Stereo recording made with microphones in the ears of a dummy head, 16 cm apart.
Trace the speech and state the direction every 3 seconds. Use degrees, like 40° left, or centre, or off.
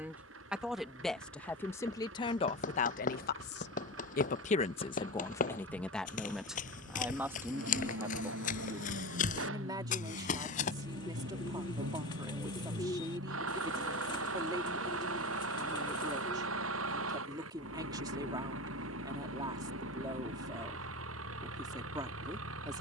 20° left, 30° left, 10° right, 20° right, 20° right, 20° right, 20° right, 20° right.